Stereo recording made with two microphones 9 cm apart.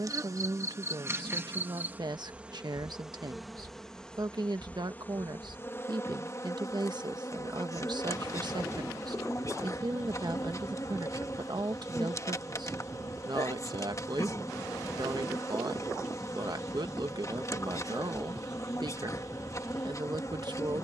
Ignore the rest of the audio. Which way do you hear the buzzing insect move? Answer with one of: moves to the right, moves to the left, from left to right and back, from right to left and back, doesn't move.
moves to the left.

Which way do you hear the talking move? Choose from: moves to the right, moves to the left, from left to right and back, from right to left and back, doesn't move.
doesn't move.